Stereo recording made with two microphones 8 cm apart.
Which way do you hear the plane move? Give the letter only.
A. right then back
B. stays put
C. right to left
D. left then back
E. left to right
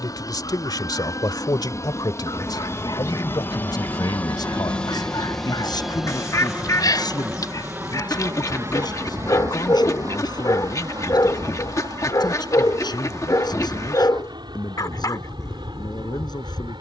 E.